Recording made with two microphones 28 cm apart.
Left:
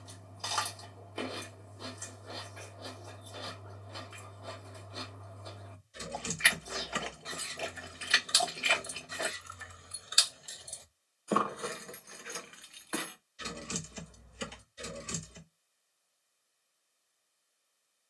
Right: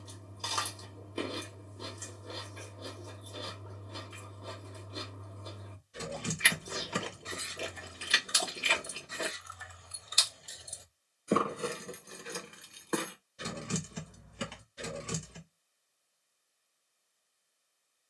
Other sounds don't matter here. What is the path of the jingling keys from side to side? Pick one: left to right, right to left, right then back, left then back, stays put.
left then back.